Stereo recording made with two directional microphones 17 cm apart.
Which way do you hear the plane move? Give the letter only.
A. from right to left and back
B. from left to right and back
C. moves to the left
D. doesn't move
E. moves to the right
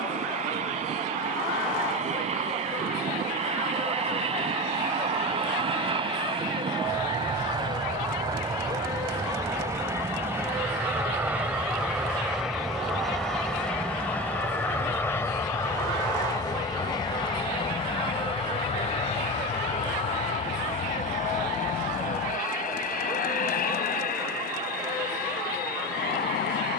C.